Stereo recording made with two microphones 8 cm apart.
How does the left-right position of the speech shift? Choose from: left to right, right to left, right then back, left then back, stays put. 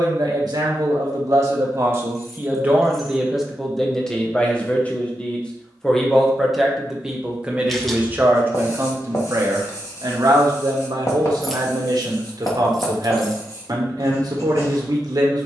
left then back.